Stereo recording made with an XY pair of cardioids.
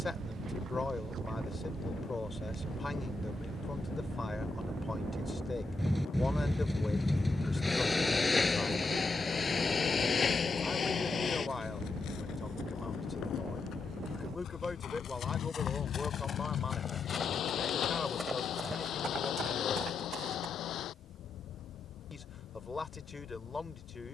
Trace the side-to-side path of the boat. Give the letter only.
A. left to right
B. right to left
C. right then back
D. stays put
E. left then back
B.